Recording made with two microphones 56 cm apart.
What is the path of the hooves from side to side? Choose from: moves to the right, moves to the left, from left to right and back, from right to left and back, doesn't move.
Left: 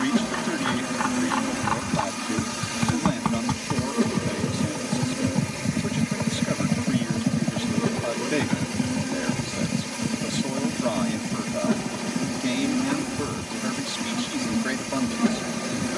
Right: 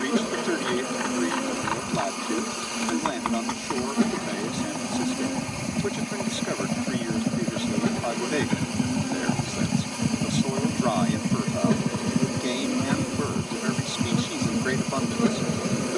moves to the right.